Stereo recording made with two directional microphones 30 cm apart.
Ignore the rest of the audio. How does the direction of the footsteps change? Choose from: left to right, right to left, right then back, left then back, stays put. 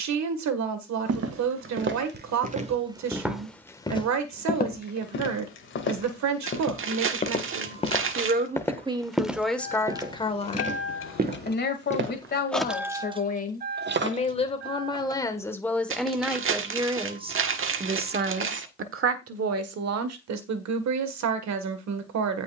left then back.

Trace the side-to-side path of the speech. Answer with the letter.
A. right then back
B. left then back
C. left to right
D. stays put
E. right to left
B.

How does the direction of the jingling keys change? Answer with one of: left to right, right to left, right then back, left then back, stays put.
left to right.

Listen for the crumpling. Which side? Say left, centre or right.
right.